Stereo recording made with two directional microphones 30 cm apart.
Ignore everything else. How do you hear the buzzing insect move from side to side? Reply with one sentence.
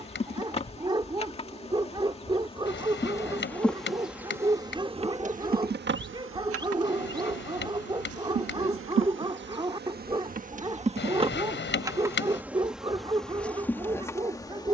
In this clip you hear the buzzing insect move from left to right and back again.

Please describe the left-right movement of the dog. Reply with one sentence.
You can hear the dog stay put.